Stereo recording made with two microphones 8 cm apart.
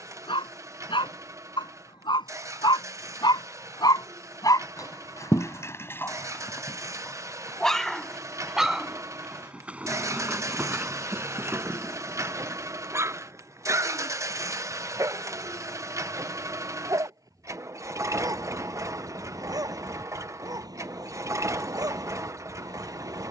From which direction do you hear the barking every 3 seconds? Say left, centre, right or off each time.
left, left, centre, right, right, right, right, right.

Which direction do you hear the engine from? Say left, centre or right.
right.